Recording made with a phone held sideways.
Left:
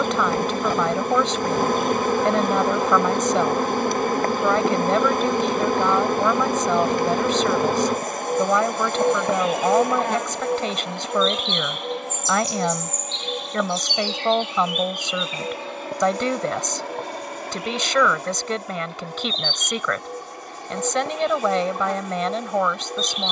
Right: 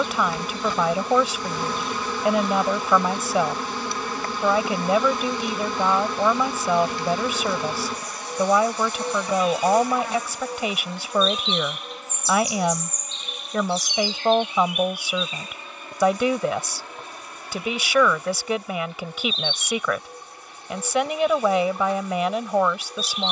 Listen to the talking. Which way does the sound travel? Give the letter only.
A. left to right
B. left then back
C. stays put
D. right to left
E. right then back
C.